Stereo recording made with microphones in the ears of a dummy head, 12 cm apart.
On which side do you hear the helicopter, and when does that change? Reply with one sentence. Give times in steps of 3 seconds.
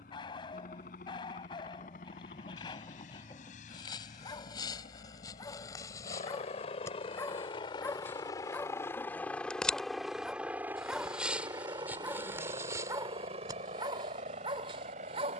You can hear the helicopter on the left from 0 s, in the centre from 9 s and on the right from 12 s.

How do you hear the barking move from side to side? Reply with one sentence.
You can hear the barking move from left to right.